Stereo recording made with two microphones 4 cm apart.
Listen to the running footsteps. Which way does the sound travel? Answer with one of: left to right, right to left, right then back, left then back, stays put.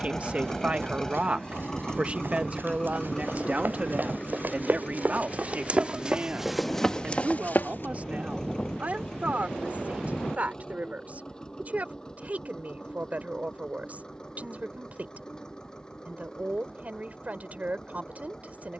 right to left.